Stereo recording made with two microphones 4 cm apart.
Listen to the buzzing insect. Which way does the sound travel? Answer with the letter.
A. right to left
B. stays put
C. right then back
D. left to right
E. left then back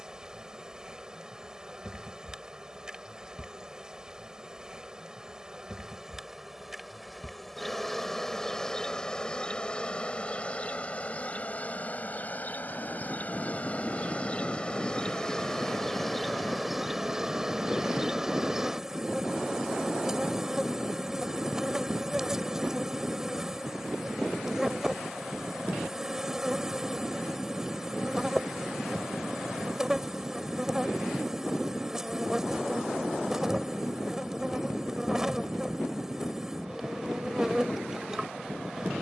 E.